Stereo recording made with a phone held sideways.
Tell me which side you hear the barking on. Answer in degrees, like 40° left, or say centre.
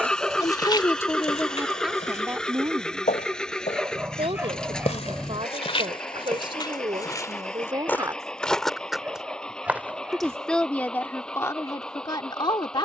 10° right.